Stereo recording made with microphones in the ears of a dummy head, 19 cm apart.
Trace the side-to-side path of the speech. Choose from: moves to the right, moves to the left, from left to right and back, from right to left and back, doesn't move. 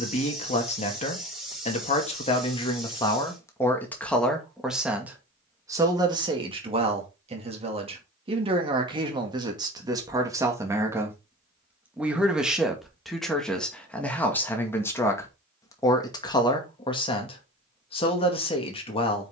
from left to right and back.